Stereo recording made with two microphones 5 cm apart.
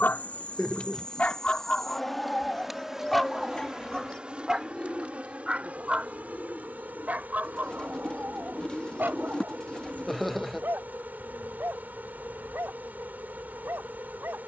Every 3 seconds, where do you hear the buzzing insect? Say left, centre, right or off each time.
centre, right, right, right, right.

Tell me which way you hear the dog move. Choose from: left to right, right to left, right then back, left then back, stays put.
left to right.